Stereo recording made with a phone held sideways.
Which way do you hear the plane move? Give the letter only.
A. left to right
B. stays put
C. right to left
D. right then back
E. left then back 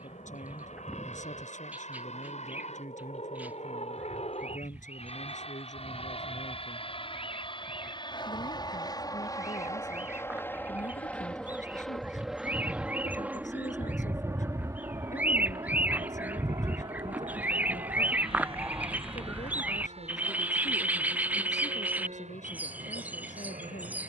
A.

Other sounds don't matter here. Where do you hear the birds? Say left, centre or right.
centre.